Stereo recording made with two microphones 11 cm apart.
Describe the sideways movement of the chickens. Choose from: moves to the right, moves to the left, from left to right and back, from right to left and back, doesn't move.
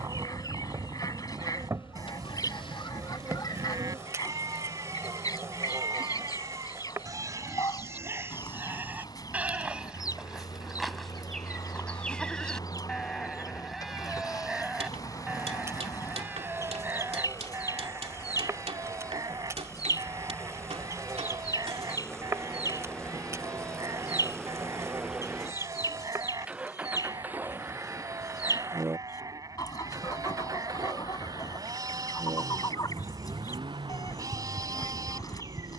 doesn't move.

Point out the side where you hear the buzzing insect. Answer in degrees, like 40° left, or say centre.
30° right.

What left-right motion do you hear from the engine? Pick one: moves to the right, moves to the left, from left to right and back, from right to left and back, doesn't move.
moves to the right.